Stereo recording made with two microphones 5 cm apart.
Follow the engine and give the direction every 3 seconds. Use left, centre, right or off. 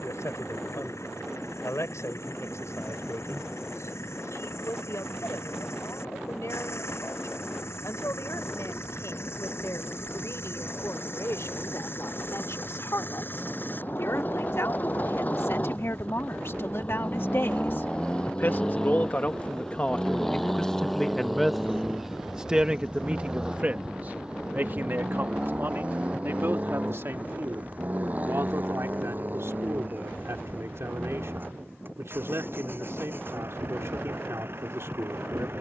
left, left, left, left, left, left, centre, centre, right, right, right, right.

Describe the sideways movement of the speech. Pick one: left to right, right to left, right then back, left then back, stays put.
left to right.